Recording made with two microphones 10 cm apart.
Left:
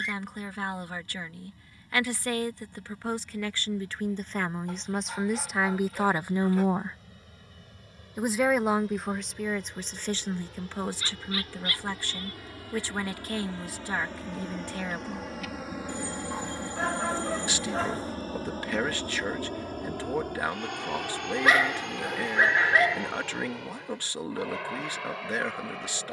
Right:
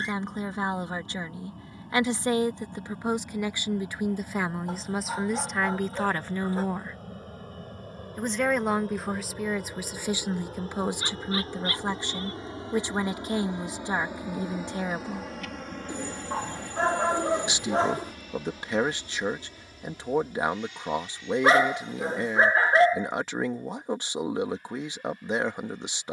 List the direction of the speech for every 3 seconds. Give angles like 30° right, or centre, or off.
20° right, 10° right, 10° left, 10° right, 20° right, 20° right, 20° right, 20° right, 20° right.